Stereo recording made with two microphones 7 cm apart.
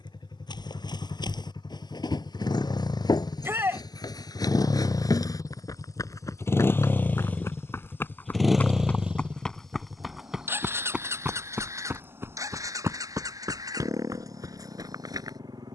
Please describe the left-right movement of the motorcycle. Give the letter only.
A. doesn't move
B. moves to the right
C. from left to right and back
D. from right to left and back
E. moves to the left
B.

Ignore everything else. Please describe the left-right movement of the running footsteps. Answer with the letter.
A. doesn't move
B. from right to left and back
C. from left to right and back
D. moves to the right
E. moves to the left
D.